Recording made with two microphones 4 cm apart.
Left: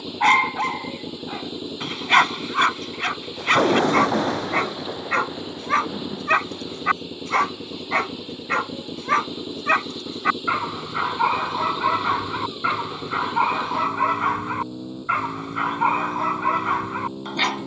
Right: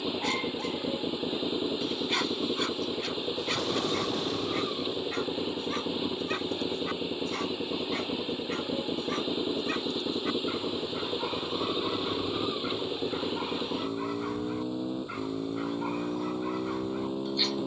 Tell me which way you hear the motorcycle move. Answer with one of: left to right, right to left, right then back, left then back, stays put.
stays put.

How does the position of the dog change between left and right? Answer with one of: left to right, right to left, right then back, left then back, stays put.
stays put.